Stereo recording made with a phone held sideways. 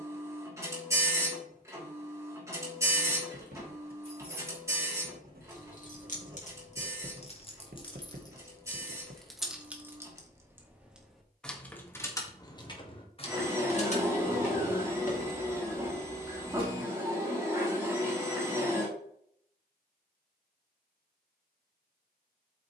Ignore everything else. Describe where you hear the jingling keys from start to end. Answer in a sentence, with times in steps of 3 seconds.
In this clip you hear the jingling keys not at all from 0 s, on the left from 3 s, in the centre from 9 s, on the left from 12 s and not at all from 18 s.